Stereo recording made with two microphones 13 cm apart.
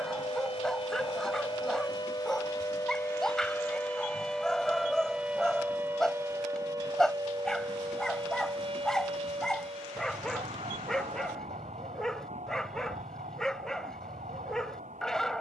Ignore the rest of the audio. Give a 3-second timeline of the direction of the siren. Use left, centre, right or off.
left, centre, right, right, right.